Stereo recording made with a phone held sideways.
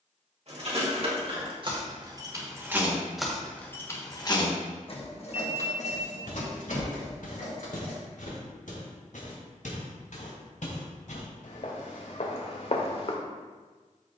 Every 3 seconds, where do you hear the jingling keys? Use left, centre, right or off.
right, left, left, off, off.